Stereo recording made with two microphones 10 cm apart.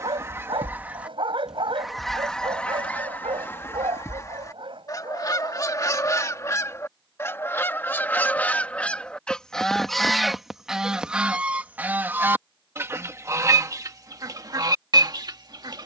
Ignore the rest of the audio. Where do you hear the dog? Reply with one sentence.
In this clip you hear the dog on the right.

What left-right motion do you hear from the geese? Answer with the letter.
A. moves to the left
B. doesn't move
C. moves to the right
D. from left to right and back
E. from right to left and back
E.